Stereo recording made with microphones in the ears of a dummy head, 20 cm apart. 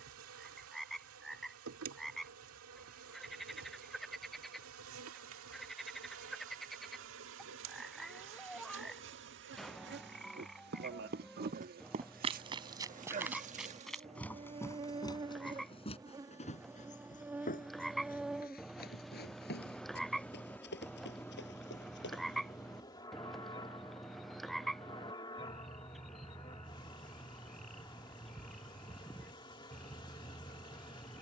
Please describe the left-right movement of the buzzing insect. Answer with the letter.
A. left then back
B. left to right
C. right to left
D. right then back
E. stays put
C.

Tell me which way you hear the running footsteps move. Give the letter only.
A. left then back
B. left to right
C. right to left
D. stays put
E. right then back
C.